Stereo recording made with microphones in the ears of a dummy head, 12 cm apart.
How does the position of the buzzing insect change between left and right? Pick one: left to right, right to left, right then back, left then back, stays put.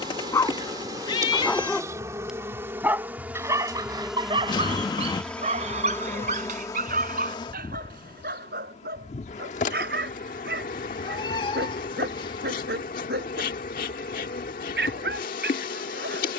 right to left.